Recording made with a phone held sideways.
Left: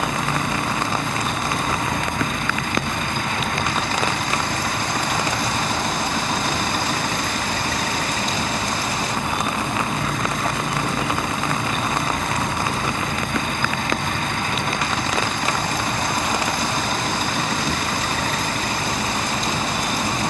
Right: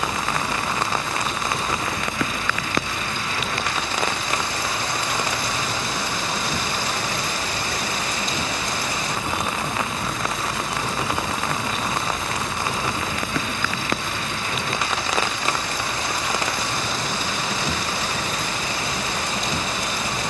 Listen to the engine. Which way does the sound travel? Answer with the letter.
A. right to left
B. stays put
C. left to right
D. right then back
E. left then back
B.